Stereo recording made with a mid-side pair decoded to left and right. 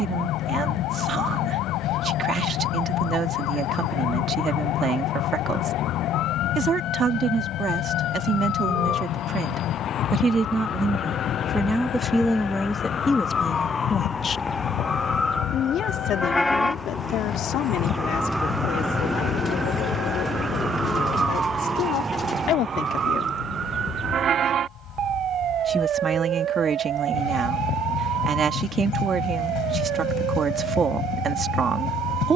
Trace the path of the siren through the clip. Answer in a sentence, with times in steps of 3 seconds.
You can hear the siren on the left from 0 s, in the centre from 15 s and on the right from 21 s.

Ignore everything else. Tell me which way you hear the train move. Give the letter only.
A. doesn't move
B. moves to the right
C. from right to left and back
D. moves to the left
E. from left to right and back
A.